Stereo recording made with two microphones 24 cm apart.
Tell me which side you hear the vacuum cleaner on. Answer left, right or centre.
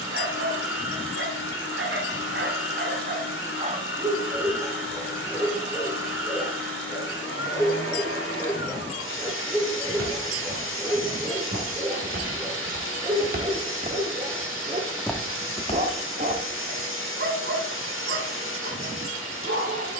left.